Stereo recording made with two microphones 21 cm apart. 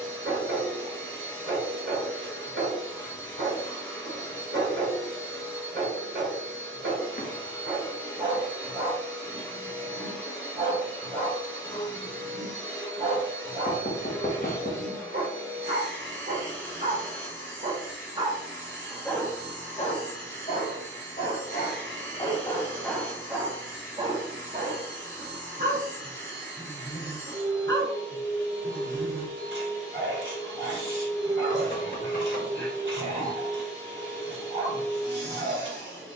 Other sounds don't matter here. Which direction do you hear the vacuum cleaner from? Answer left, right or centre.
right.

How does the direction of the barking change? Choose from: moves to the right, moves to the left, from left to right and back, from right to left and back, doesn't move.
from right to left and back.